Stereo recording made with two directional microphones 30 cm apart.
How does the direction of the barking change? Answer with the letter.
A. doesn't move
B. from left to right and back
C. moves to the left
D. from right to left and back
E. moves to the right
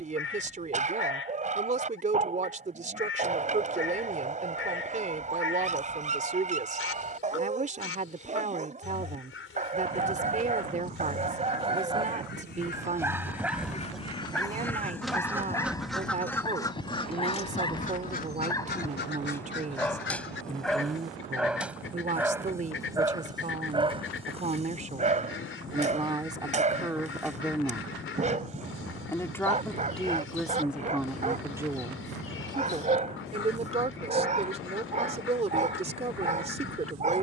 D.